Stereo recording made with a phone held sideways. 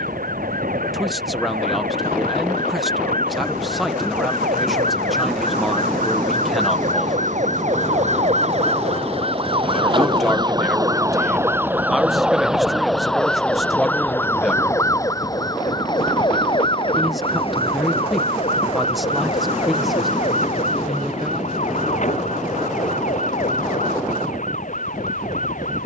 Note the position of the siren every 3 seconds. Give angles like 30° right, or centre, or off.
80° right, 70° right, 50° right, 30° right, 10° left, 30° left, 50° left, 50° left, 60° left.